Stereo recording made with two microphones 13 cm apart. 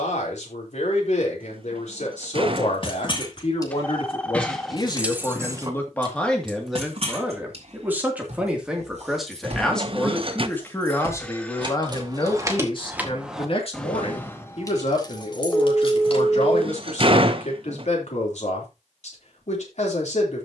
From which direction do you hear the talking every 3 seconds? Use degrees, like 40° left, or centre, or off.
70° left, 40° left, centre, 20° left, 50° left, 70° left, 70° left.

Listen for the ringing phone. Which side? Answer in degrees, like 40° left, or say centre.
10° left.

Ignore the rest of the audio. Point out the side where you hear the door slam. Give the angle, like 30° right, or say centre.
50° right.